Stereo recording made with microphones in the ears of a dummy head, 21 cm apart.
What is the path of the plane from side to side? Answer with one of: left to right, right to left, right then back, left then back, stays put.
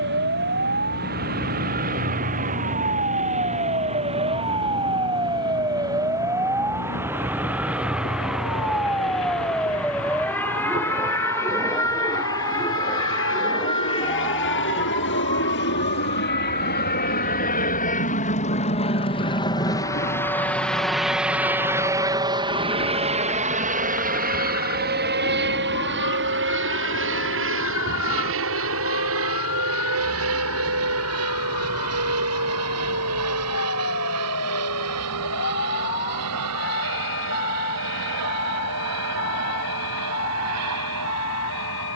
left to right.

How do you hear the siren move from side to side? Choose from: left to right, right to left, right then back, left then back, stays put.
right to left.